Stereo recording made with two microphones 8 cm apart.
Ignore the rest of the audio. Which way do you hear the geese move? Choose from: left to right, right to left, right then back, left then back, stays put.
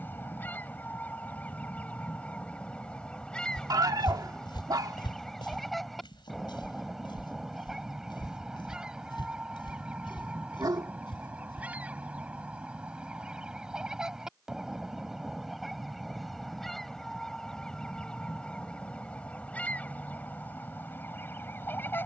right then back.